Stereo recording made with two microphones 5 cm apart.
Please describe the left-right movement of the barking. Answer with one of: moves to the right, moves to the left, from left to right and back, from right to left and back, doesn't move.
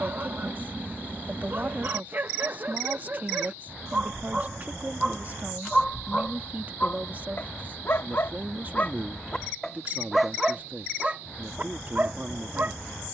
from right to left and back.